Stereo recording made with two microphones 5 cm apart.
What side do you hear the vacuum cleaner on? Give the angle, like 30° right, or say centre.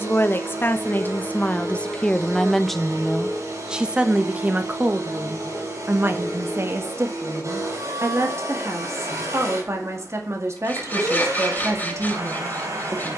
70° right.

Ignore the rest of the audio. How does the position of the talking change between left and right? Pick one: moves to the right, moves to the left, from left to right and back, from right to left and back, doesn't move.
moves to the right.